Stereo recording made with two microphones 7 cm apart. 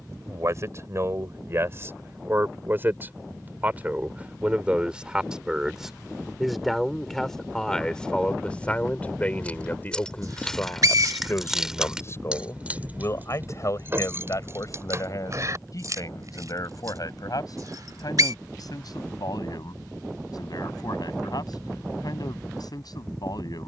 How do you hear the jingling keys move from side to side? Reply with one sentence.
You can hear the jingling keys move from left to right.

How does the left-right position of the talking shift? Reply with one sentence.
In this clip you hear the talking travel towards the left.